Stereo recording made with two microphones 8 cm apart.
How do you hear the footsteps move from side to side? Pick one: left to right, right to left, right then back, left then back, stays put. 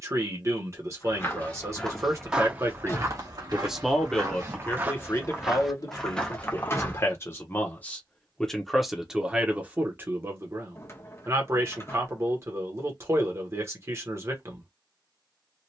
right then back.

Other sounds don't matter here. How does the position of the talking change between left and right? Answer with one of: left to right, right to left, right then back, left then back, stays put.
left then back.